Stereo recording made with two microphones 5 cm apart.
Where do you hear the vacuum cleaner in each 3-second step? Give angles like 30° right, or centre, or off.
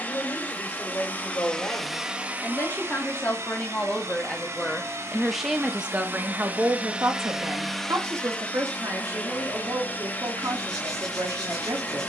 10° left, 60° right, centre, 30° left.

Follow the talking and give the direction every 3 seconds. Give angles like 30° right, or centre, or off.
50° left, 20° left, 60° right, 80° right.